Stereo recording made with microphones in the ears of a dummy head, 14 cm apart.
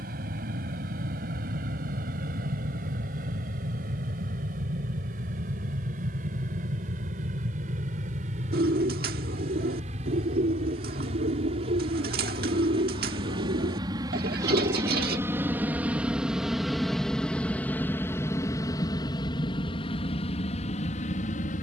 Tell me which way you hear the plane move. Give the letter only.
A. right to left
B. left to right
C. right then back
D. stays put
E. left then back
A.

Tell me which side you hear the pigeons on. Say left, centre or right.
right.